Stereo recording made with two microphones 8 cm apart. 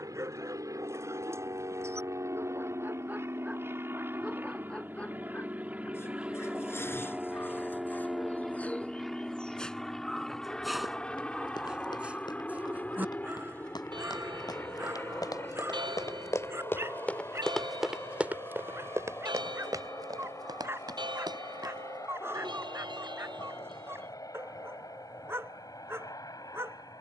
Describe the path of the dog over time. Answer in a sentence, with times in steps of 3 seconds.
You can hear the dog on the right from 0 s, in the centre from 3 s, on the left from 6 s, in the centre from 9 s and on the right from 12 s.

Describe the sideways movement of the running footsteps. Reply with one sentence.
You can hear the running footsteps move from left to right.